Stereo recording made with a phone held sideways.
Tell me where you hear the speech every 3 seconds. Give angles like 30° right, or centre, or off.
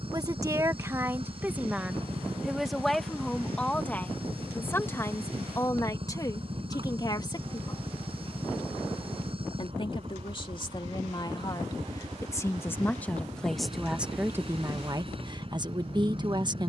10° right, 10° left, 30° left, 40° left, centre, 30° right.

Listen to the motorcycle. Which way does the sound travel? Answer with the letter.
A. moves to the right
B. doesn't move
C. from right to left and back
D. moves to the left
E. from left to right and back
B.